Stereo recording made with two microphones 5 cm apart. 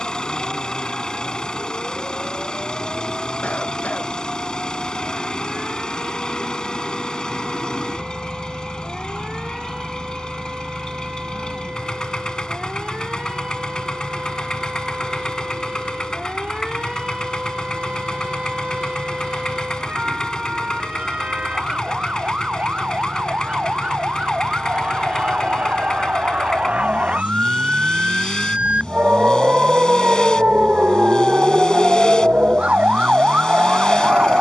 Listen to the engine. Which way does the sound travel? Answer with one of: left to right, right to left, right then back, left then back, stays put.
stays put.